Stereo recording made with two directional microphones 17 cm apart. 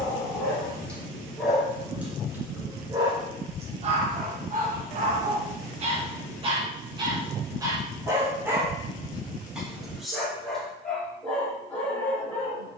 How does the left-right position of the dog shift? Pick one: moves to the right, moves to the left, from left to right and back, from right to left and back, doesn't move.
from left to right and back.